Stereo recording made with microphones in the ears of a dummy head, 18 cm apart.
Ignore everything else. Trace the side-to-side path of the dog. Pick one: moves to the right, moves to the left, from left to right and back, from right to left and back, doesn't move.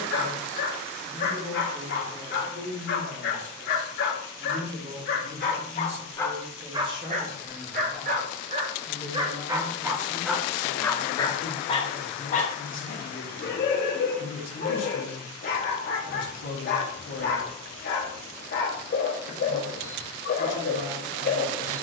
from left to right and back.